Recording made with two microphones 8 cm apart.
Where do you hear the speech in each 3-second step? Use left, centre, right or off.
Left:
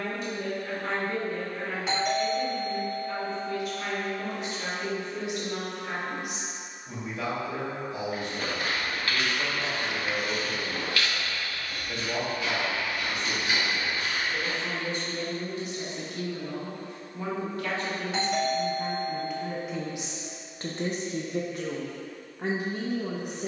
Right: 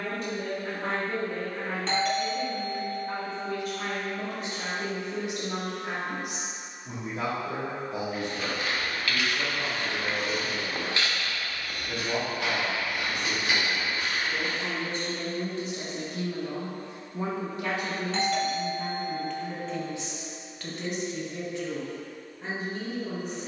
right, right, right, right, right, right, centre, left.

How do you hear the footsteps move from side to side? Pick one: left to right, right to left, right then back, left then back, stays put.
left to right.